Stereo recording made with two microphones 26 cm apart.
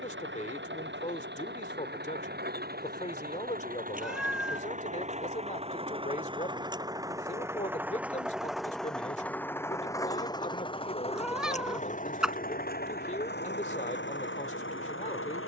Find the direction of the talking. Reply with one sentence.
You can hear the talking on the left.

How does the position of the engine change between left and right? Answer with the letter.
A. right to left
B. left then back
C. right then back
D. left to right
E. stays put
A.